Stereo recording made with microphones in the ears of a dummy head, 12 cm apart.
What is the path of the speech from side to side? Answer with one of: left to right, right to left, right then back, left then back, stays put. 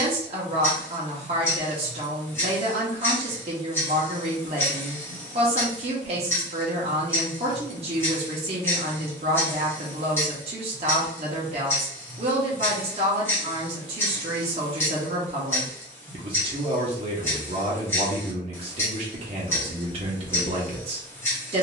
stays put.